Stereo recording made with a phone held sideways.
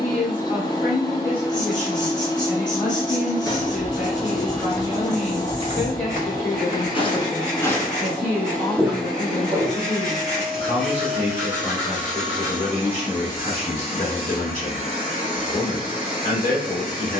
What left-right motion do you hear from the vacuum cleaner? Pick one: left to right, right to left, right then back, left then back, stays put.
left to right.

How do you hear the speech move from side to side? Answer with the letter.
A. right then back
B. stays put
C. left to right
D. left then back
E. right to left
B.